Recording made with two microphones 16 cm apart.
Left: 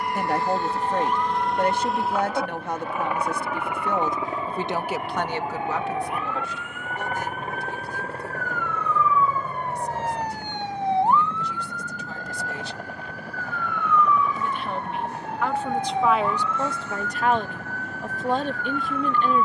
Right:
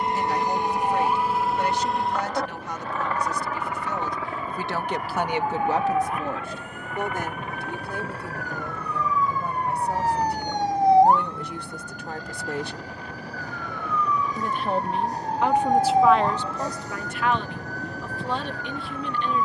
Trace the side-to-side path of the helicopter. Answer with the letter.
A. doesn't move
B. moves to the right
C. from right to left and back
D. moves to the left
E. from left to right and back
D.